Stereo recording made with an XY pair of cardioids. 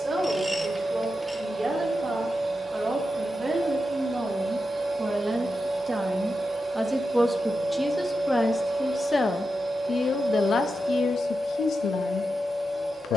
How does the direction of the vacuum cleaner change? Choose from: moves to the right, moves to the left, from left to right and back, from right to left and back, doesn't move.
doesn't move.